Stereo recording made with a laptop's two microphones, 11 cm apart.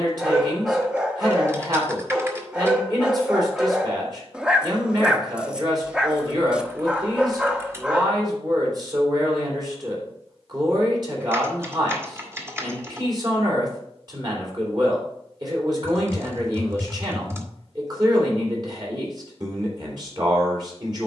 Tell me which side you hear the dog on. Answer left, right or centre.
centre.